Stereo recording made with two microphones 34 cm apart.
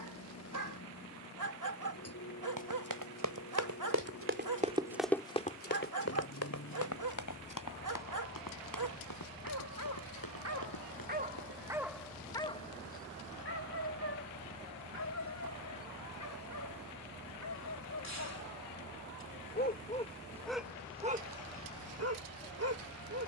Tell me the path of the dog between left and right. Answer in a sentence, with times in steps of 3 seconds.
You can hear the dog on the right from 0 s, on the left from 12 s and on the right from 21 s.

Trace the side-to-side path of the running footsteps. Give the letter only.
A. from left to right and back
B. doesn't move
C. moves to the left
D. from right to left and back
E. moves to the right
C.